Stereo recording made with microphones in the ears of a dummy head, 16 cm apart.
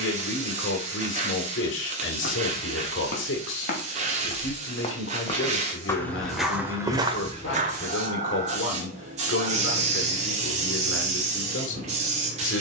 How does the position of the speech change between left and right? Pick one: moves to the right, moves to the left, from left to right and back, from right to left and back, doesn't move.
doesn't move.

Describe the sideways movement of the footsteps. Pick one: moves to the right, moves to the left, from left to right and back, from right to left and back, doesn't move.
moves to the right.